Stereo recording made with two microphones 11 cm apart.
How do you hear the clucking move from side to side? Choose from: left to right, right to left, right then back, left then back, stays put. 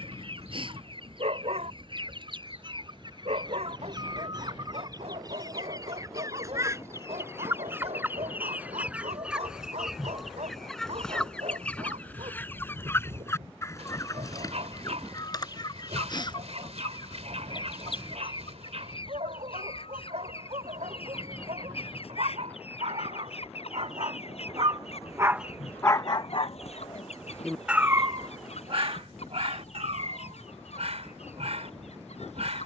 right to left.